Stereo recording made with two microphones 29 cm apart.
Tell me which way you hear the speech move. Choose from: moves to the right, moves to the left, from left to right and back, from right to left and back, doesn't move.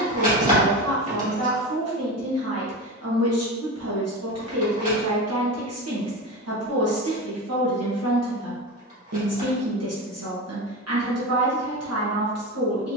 doesn't move.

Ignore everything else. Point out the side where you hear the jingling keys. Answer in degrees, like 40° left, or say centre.
30° right.